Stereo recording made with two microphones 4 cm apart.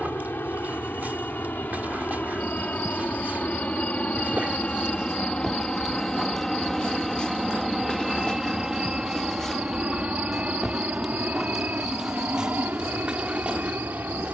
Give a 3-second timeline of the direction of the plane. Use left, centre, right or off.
left, left, centre, right, right.